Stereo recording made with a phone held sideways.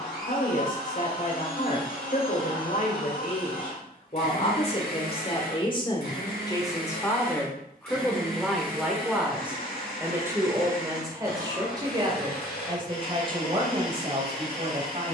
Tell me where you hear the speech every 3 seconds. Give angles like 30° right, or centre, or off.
60° left, 40° left, 10° left, 20° right, 30° right.